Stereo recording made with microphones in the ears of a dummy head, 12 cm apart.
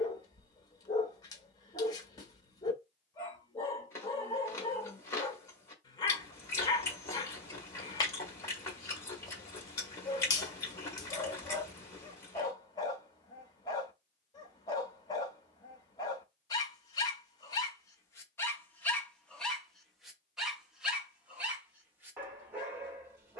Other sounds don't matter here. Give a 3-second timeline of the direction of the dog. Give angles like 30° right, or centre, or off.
30° left, 30° left, 30° left, 30° left, 30° left, 30° left, 10° left, 20° right.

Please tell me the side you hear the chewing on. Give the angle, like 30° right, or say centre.
20° left.